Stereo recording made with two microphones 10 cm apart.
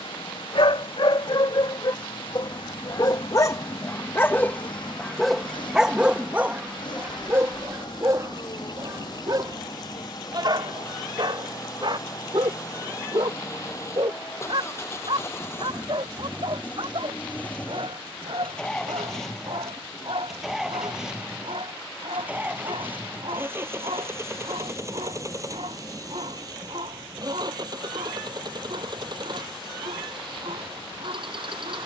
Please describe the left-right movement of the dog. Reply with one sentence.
You can hear the dog move to the right.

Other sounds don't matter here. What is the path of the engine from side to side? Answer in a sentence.
In this clip you hear the engine travel towards the right.